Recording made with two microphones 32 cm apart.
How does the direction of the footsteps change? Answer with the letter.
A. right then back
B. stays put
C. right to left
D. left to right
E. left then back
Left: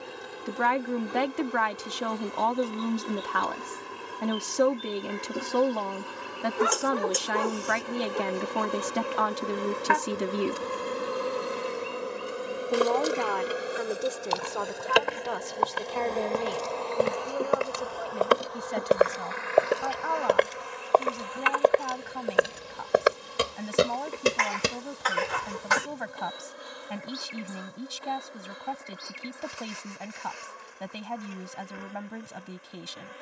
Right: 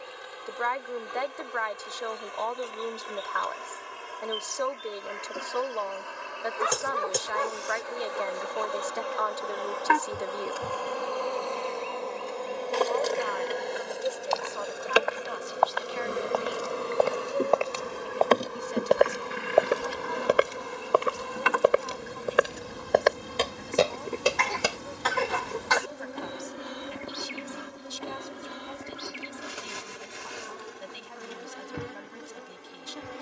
A.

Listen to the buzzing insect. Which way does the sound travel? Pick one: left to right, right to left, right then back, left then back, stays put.
left to right.